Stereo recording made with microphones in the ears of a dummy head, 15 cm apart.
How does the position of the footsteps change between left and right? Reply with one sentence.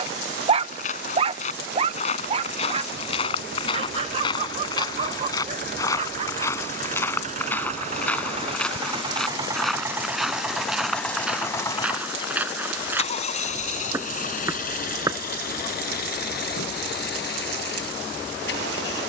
You can hear the footsteps go from the left side to the right.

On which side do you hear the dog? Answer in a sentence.
In this clip you hear the dog on the right.